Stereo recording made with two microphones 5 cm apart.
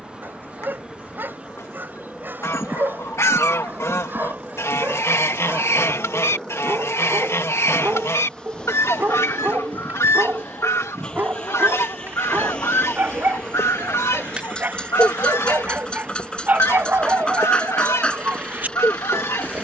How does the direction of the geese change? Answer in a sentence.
You can hear the geese stay in one place.